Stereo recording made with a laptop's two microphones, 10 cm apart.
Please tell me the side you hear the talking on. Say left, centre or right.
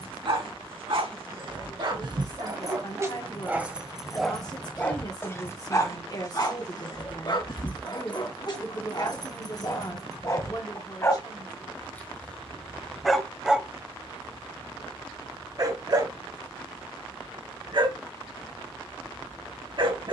left.